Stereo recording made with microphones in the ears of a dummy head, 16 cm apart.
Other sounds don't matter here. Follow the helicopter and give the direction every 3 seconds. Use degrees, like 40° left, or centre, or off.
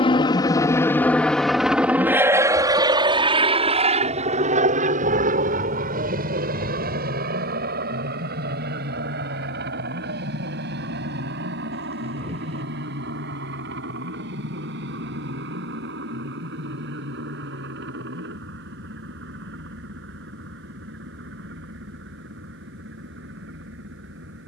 centre, 40° right, 60° right, 60° right, 70° right, 70° right, 70° right, 70° right.